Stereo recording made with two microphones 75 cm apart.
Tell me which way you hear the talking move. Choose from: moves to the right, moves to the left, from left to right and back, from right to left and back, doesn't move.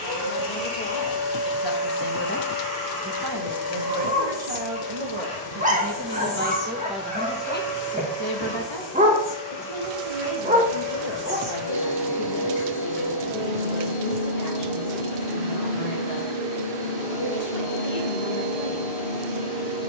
from left to right and back.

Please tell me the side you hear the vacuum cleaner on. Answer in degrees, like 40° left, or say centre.
50° left.